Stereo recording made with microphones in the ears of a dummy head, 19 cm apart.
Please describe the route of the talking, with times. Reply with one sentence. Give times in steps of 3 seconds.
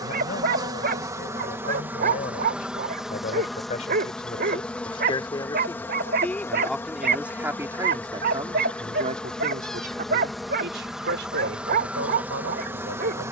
You can hear the talking on the left from 0 s, in the centre from 6 s and on the right from 9 s.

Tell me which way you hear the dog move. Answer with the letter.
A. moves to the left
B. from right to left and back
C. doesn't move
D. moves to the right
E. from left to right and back
C.